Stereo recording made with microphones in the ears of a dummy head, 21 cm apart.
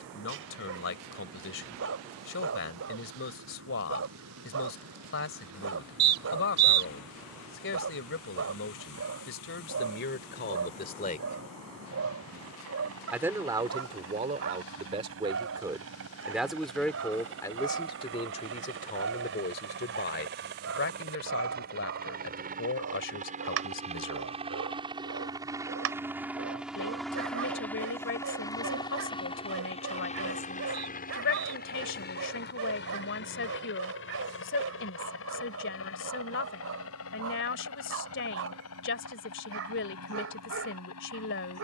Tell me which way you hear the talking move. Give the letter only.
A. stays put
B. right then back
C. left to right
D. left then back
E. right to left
B.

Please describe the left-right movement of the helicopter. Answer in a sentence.
In this clip you hear the helicopter move to the left.